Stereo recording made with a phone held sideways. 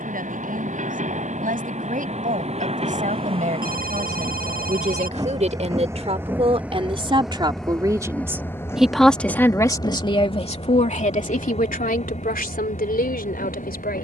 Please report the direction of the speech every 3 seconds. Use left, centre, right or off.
right, right, right, left, left.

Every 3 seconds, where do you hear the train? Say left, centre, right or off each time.
right, right, centre, left, left.